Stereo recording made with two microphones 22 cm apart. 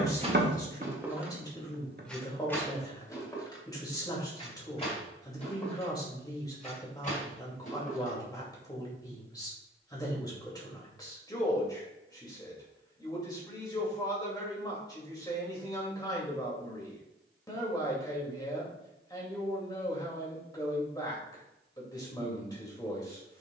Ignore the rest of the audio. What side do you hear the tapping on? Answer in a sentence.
You can hear the tapping on the right.